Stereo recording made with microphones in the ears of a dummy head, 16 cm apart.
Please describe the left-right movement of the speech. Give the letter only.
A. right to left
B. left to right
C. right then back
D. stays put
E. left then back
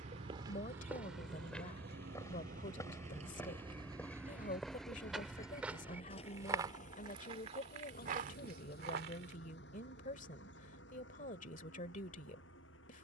D.